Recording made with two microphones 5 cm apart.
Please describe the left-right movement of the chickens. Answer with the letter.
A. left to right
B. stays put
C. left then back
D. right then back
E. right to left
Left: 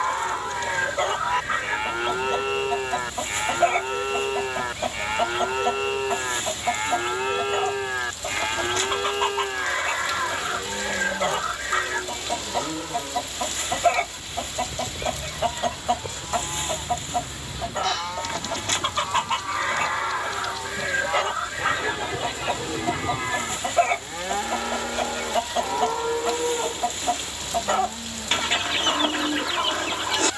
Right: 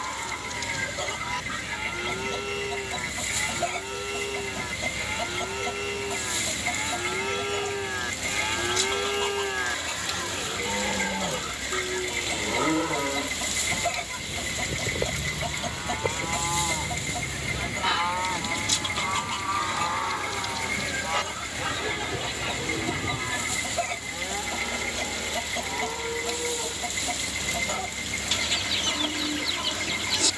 B.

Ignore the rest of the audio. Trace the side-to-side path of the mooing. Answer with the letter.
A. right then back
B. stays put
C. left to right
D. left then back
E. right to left
A.